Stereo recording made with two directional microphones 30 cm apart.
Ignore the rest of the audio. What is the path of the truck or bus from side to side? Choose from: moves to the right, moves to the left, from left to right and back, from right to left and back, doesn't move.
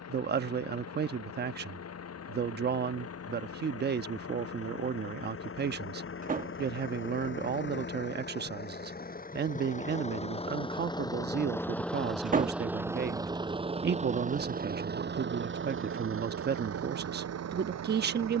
moves to the right.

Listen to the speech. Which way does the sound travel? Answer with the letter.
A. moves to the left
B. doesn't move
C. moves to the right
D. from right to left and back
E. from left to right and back
B.